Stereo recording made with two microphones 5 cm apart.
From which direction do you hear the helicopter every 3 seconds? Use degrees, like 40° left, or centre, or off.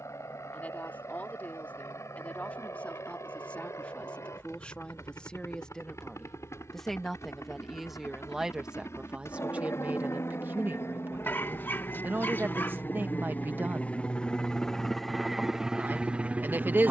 80° left, 70° left, 70° left, 60° left, 30° left, 20° right.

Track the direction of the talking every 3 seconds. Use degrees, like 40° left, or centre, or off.
30° left, 20° left, centre, 40° right, 40° right, 40° right.